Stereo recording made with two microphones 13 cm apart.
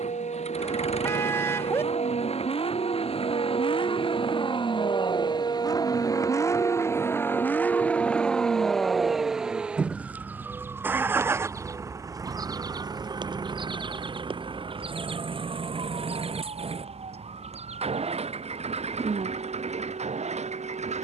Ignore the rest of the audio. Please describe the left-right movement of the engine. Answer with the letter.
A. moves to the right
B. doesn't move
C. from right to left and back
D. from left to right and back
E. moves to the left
A.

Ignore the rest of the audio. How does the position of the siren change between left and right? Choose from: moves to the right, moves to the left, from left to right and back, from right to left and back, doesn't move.
moves to the right.